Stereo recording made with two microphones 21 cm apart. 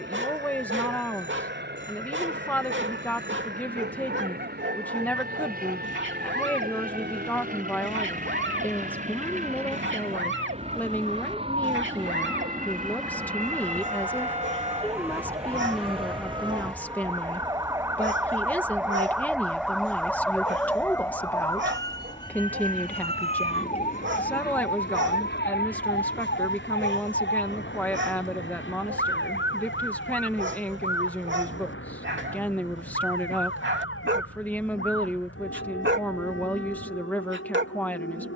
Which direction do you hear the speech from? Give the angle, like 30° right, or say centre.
10° left.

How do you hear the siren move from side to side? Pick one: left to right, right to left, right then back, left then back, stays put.
right to left.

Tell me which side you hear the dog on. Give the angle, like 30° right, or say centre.
70° right.